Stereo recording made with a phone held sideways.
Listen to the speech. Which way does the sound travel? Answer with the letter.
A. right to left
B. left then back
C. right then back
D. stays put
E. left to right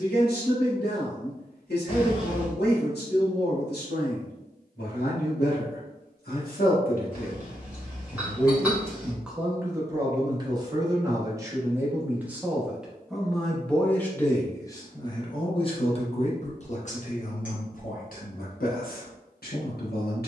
C.